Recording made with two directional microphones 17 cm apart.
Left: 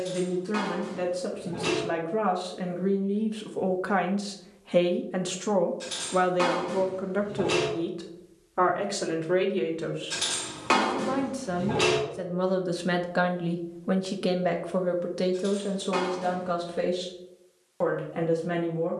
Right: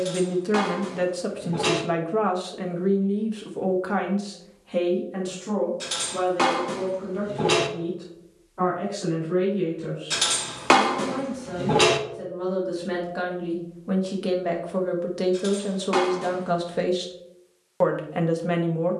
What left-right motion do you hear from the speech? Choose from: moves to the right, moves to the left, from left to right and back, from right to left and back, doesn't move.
from right to left and back.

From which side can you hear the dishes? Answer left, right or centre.
right.